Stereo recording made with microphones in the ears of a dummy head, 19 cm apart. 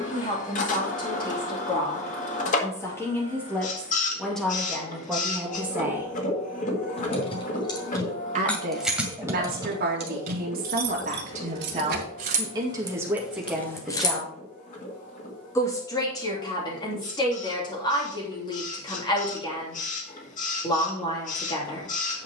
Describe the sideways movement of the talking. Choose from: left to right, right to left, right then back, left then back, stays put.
right then back.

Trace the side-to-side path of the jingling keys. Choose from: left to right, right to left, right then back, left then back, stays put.
right then back.